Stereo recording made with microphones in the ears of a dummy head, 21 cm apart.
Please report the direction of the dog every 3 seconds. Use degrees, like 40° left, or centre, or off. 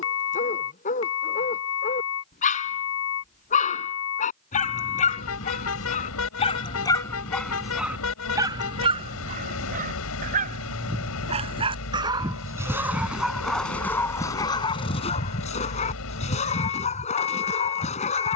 30° left, 30° left, centre, 30° right, centre, 30° left.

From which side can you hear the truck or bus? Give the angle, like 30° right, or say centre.
70° left.